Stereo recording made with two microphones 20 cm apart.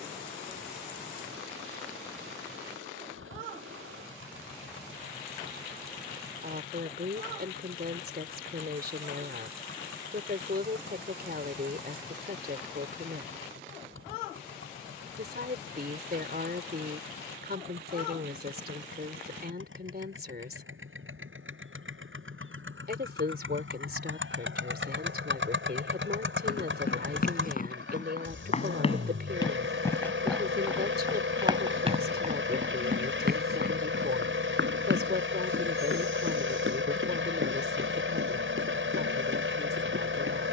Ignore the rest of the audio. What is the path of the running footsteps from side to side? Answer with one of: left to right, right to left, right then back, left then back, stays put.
left to right.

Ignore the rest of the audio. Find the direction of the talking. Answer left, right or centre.
right.